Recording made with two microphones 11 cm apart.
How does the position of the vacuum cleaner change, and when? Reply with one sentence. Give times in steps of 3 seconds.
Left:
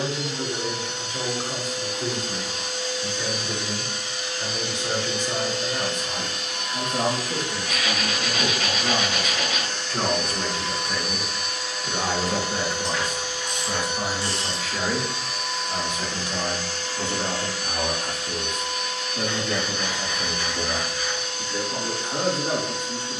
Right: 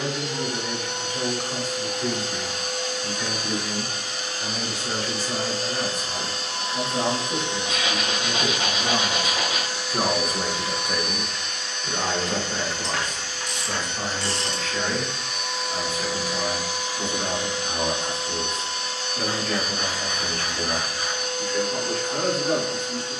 In this clip you hear the vacuum cleaner on the right from 0 s, in the centre from 9 s and on the right from 18 s.